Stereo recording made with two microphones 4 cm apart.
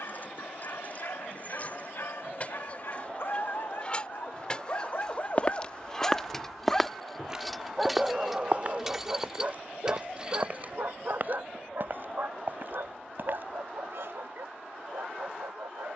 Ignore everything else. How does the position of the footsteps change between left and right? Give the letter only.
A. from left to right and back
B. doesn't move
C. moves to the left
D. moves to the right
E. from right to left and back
D.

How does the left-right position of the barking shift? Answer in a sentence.
In this clip you hear the barking travel towards the right.